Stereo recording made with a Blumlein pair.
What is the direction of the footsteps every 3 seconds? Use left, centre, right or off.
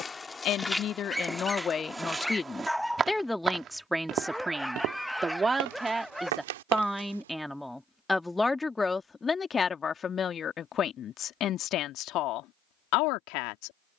centre, right, right, off, off.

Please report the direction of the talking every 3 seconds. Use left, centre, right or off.
left, centre, centre, left, left.